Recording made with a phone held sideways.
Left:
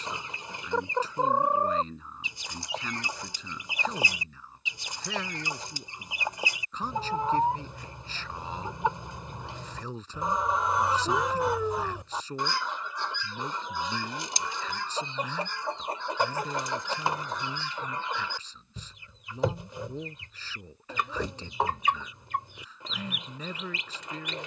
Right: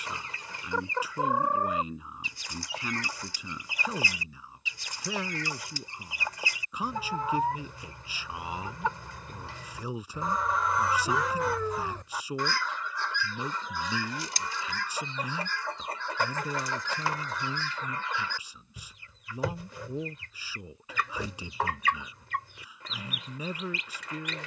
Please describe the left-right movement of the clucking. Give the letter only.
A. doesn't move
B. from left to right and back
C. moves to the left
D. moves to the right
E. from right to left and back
A.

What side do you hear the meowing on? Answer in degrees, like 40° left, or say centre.
10° left.